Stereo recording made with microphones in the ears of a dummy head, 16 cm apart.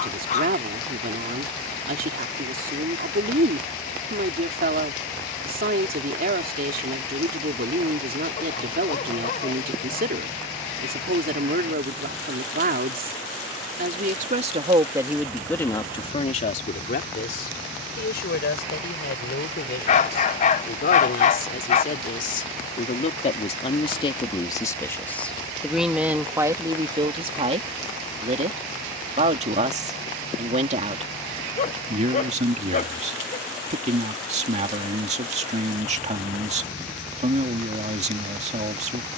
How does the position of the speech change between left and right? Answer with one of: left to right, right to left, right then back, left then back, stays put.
left then back.